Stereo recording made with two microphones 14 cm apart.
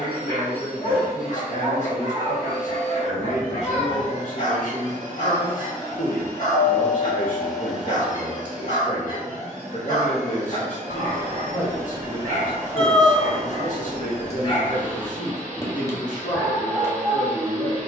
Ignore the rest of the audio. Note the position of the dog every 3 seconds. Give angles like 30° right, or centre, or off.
60° left, 60° left, 60° left, 60° left, 50° left, 20° left.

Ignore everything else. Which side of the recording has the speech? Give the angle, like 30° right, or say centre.
60° left.